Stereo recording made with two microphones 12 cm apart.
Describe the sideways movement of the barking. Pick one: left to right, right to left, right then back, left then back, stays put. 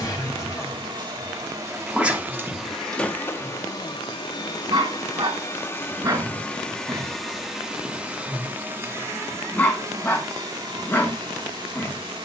right then back.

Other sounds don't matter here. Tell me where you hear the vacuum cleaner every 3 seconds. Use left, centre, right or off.
right, left, centre, right.